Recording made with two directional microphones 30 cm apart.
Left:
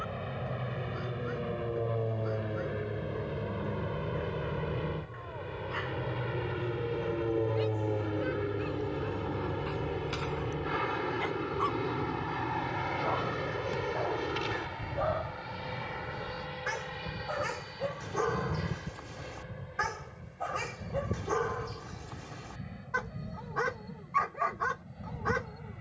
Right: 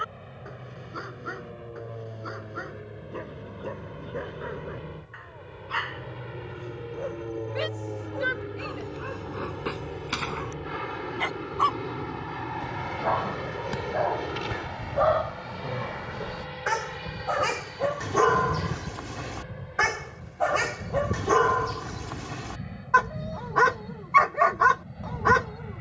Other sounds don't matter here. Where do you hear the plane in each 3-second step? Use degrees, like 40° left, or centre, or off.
50° left, 40° left, 20° left, 10° left, 10° right, 20° right, 30° right, 40° right, 40° right.